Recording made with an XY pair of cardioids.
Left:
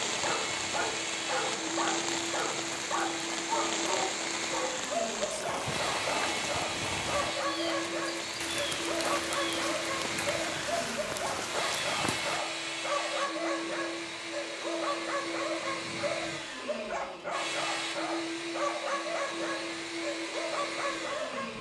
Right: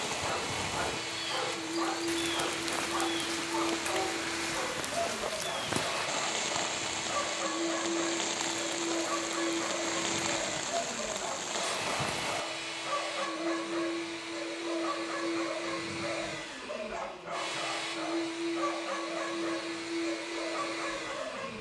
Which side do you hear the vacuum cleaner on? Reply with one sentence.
You can hear the vacuum cleaner on the left.